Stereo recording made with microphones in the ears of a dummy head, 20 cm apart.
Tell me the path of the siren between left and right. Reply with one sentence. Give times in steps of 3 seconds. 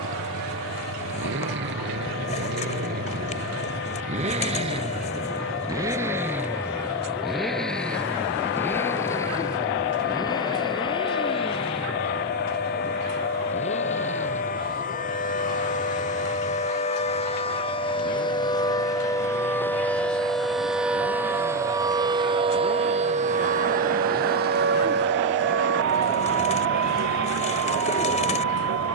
You can hear the siren on the left from 0 s, in the centre from 18 s and on the right from 21 s.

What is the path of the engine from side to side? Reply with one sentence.
In this clip you hear the engine move to the left.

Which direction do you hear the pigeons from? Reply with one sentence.
You can hear the pigeons on the left.